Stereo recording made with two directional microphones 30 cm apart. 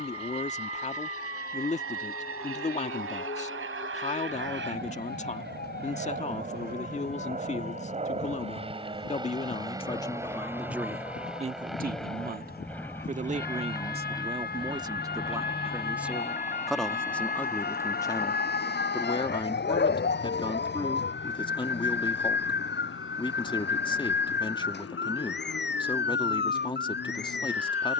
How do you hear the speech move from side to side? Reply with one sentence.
In this clip you hear the speech move from left to right and back again.